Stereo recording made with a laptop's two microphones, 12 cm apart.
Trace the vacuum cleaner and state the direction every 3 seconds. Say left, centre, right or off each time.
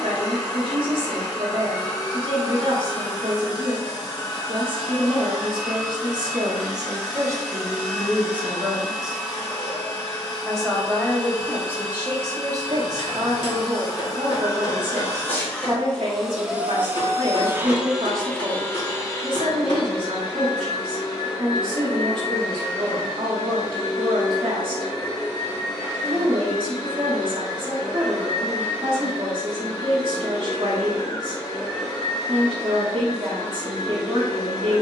left, left, left, left, left, centre, left, left, left, left, left, left.